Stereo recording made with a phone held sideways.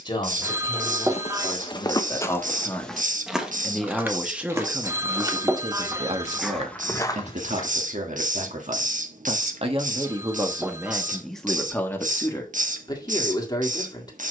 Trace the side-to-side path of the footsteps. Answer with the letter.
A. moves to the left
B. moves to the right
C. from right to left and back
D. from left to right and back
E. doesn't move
D.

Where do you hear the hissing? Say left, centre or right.
right.